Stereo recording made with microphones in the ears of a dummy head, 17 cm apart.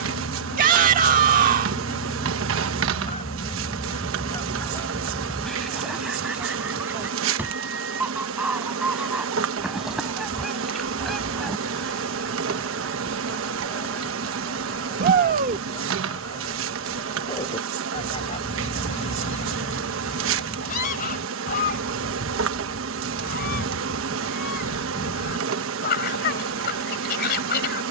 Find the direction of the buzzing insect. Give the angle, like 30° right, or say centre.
80° right.